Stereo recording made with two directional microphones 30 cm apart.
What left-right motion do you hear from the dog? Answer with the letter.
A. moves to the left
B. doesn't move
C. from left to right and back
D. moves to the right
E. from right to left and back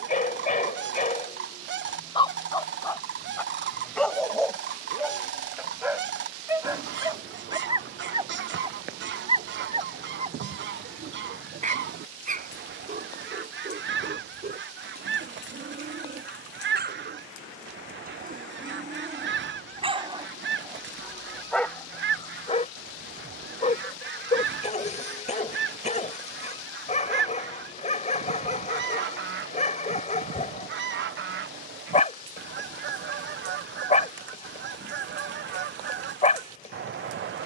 C.